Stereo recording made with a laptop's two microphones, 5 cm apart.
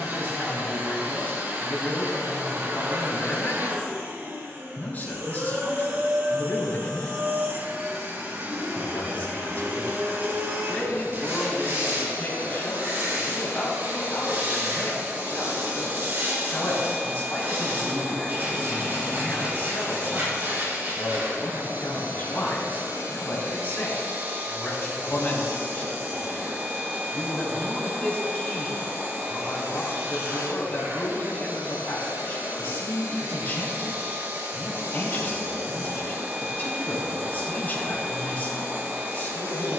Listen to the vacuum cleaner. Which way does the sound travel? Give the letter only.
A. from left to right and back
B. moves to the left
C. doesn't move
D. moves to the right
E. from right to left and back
C.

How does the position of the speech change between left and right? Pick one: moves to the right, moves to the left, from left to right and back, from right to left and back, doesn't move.
doesn't move.